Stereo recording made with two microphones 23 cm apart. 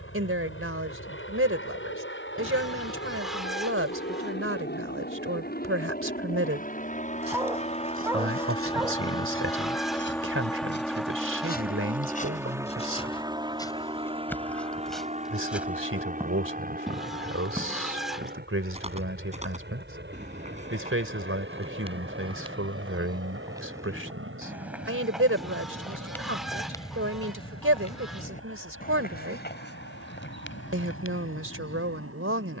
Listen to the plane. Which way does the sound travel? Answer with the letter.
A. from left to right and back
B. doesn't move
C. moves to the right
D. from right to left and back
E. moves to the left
C.